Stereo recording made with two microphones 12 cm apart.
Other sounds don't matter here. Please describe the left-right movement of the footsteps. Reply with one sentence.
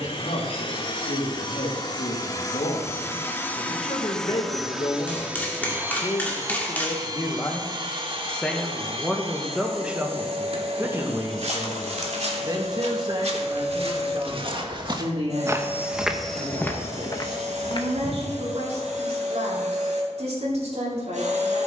In this clip you hear the footsteps move from right to left.